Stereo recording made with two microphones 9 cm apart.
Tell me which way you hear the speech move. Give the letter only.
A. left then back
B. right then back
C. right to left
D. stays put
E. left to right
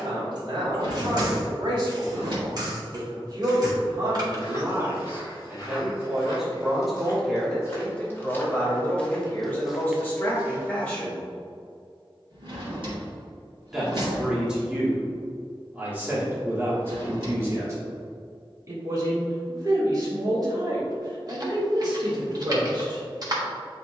A.